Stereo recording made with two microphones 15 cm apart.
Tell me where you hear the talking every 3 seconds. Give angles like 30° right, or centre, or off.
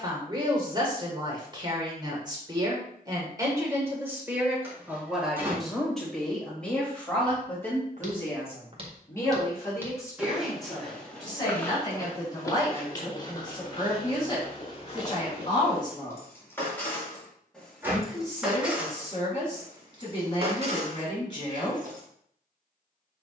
30° right, 10° right, 10° left, 20° left, 30° left, 30° left, 30° left, 30° left.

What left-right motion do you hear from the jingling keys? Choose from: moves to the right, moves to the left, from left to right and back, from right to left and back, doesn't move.
moves to the right.